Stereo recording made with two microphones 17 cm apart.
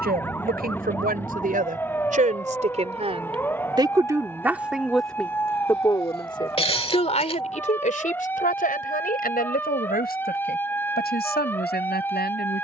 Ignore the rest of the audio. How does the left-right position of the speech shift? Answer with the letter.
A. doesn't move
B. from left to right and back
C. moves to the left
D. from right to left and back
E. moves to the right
C.